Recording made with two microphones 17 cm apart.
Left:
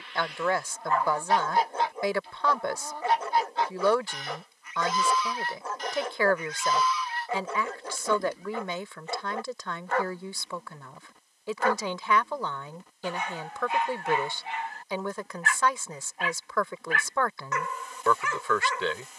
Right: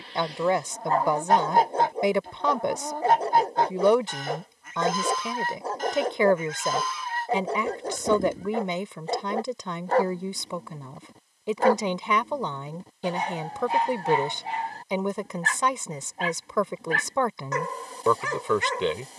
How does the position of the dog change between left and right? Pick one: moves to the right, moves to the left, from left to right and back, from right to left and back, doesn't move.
doesn't move.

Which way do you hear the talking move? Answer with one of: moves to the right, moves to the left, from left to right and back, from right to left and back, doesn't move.
doesn't move.